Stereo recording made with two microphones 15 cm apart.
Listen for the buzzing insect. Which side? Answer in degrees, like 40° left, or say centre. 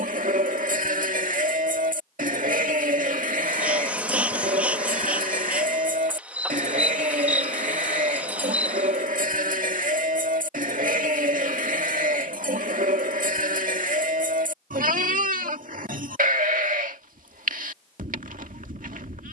10° right.